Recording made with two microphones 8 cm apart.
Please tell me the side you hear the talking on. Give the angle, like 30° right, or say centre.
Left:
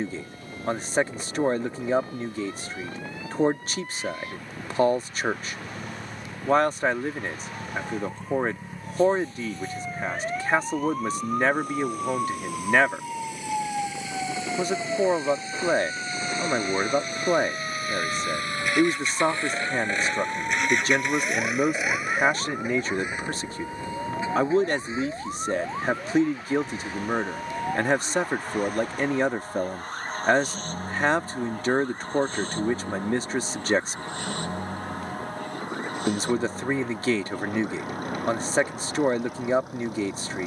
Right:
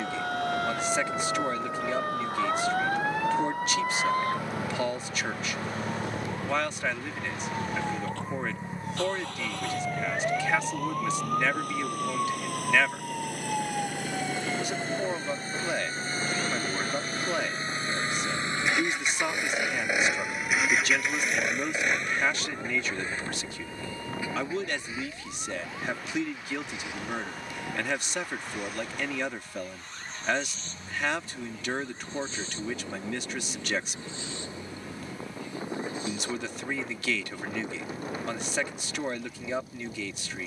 40° left.